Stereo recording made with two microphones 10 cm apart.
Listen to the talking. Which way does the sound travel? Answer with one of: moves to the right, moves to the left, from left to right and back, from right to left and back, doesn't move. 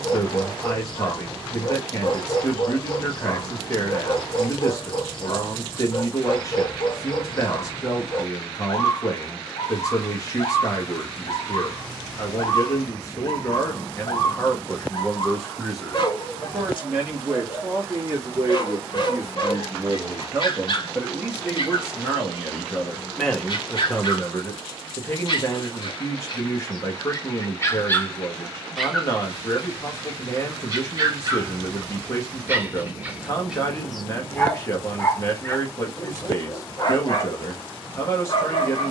from left to right and back.